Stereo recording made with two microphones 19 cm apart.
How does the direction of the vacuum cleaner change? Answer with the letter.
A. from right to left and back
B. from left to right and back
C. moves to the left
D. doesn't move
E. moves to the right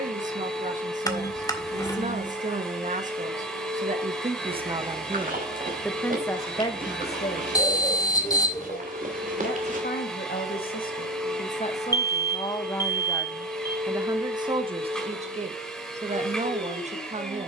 D.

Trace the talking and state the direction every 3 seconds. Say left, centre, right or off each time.
right, right, left, left, centre, right.